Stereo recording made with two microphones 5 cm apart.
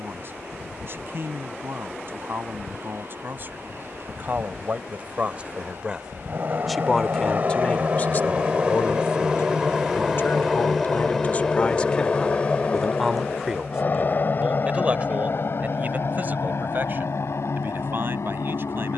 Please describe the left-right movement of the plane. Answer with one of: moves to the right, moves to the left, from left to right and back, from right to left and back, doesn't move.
moves to the left.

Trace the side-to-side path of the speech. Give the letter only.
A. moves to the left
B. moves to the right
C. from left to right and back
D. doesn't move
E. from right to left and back
E.